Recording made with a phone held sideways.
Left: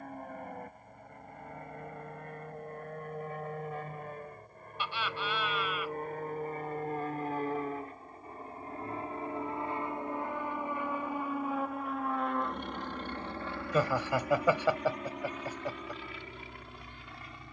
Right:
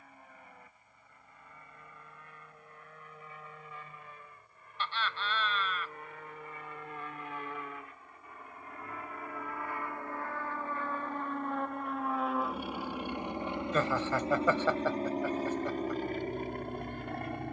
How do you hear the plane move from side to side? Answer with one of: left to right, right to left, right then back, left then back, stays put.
left to right.